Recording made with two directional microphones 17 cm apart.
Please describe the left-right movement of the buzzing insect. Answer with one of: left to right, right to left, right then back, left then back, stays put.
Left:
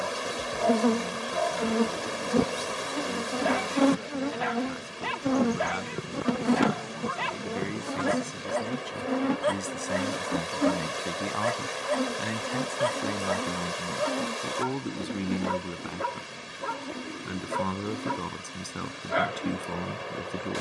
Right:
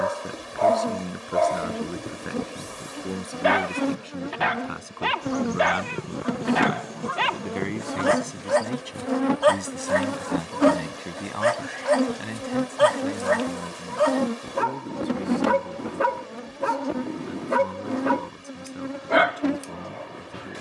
left to right.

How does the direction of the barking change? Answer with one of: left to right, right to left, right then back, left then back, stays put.
stays put.